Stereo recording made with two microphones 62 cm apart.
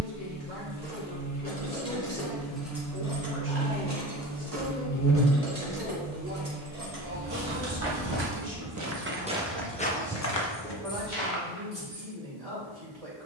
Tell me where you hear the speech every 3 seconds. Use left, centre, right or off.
right, centre, right, right, right.